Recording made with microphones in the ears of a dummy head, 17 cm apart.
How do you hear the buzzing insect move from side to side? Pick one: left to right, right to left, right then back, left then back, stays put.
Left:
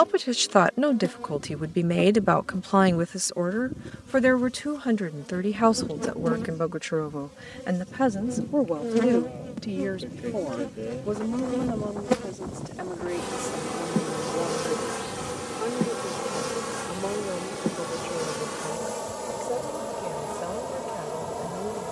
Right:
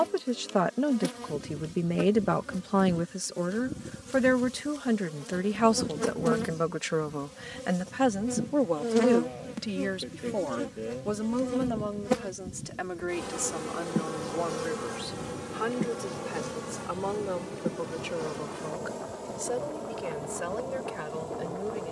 right to left.